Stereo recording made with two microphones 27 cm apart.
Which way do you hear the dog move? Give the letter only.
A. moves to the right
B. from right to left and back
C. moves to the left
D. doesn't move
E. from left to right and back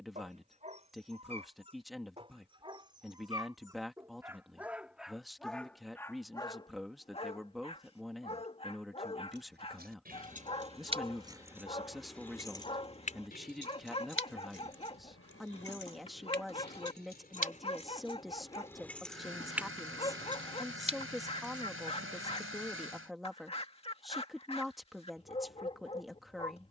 C.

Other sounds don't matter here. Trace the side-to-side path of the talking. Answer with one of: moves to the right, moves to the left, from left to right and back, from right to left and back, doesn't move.
doesn't move.